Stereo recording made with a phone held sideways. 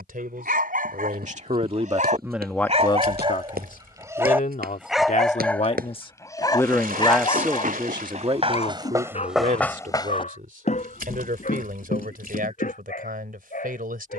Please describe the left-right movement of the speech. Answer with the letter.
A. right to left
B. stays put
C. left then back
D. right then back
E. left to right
C.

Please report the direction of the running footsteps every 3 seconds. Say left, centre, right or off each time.
right, right, right, left, left.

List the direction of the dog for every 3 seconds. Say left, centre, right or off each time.
right, centre, left, left, left.